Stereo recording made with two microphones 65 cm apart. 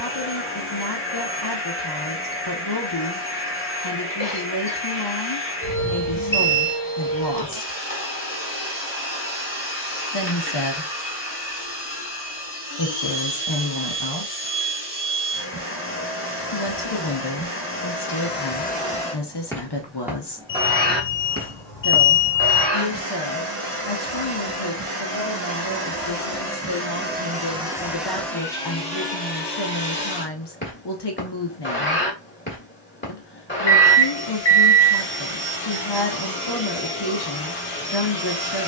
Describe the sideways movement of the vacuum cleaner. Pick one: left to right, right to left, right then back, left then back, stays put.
right then back.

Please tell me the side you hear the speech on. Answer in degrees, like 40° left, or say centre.
40° left.